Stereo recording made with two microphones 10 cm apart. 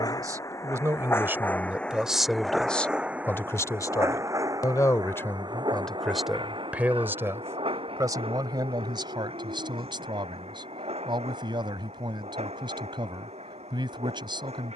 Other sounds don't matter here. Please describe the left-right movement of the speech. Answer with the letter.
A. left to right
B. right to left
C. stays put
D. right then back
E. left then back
E.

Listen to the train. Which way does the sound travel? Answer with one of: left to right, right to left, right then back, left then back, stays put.
left to right.